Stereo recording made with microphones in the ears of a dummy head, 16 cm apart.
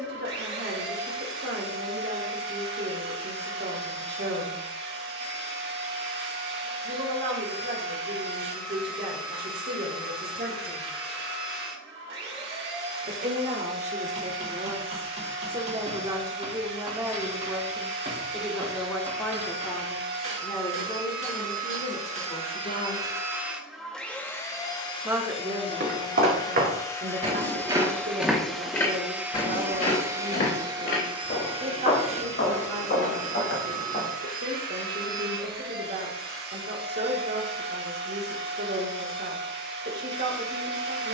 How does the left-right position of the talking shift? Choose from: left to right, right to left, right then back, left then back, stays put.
left then back.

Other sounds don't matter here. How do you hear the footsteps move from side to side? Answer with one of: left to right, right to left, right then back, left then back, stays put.
right to left.